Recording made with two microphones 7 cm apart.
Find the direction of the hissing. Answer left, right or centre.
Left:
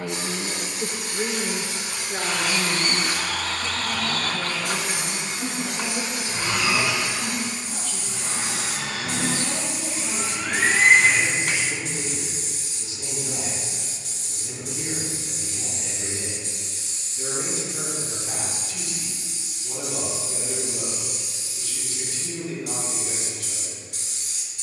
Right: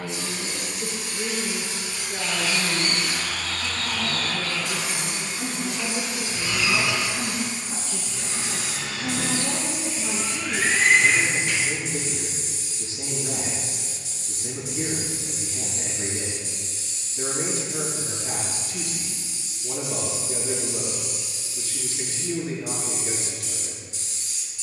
left.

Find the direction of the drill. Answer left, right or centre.
left.